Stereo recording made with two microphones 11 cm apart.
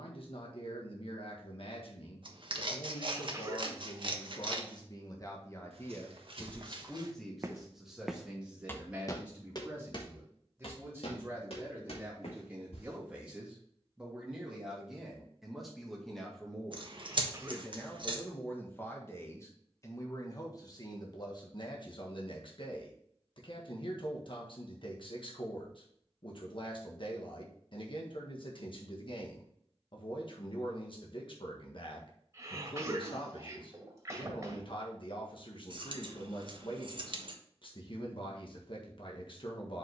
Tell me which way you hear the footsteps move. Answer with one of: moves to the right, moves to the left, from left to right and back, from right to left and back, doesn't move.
moves to the left.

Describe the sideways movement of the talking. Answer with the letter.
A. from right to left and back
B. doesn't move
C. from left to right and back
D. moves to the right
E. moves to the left
C.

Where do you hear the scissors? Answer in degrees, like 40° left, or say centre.
50° right.